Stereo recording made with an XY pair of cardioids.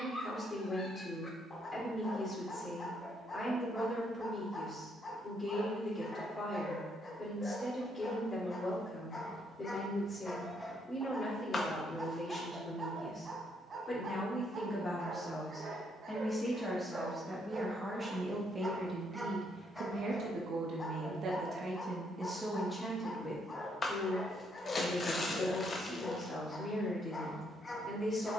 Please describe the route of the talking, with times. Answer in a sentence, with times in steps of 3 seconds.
You can hear the talking on the left from 0 s, in the centre from 15 s, on the right from 18 s, in the centre from 21 s and on the left from 24 s.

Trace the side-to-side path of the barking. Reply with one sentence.
You can hear the barking move from left to right and back again.